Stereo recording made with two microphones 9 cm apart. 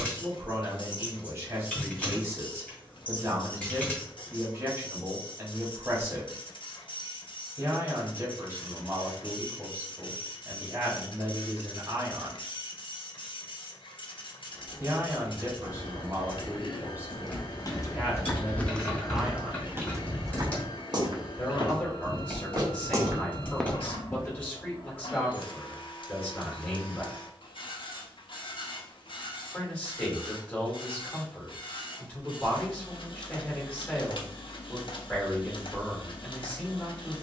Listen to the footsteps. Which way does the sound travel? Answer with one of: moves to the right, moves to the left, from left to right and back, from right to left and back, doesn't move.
from left to right and back.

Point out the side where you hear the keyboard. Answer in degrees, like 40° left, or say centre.
20° left.